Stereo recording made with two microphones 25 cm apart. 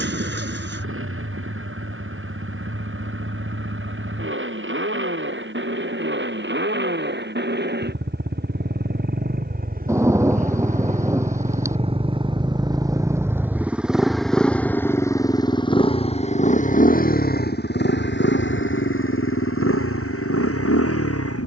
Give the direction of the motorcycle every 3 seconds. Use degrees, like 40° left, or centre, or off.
60° right, 50° right, 50° right, 30° right, 10° right, 30° left, 60° left.